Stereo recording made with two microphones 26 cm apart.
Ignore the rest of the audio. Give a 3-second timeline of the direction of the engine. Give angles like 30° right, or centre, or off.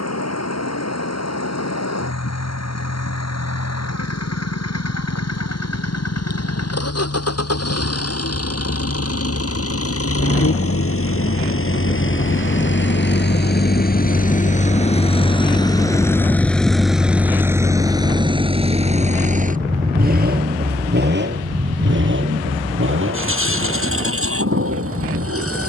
80° left, 80° left, 70° left, 60° left, 40° left, centre, 30° right, 50° right, 60° right.